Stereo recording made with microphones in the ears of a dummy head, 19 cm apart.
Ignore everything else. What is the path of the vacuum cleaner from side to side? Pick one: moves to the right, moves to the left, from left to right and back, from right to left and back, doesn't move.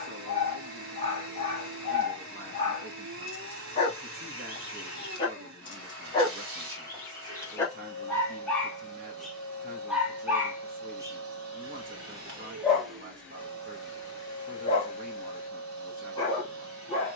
doesn't move.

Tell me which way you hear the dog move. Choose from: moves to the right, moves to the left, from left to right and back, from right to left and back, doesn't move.
from left to right and back.